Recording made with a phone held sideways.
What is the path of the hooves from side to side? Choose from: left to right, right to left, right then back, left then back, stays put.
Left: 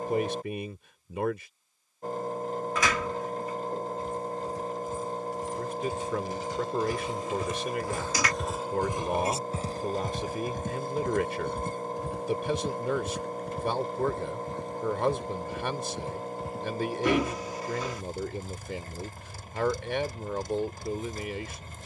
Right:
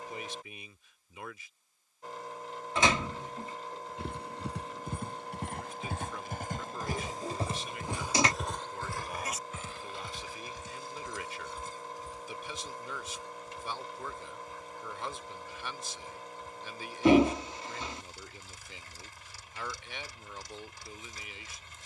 right to left.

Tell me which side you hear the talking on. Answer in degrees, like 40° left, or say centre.
60° left.